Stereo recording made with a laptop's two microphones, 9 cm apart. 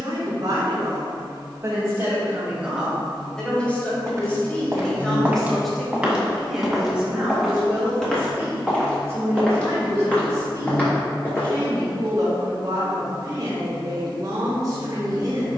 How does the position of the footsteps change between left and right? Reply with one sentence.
You can hear the footsteps travel towards the left.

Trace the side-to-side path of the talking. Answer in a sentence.
In this clip you hear the talking go left and come back.